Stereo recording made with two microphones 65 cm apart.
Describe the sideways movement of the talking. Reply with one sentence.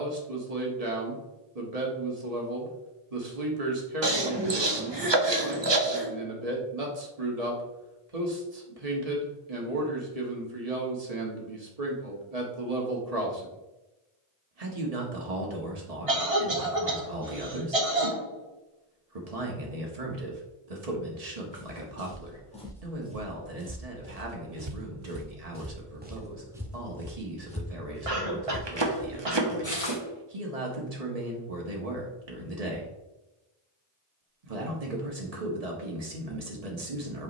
You can hear the talking stay in one place.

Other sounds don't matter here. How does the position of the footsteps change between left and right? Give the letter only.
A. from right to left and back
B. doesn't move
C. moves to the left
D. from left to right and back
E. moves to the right
D.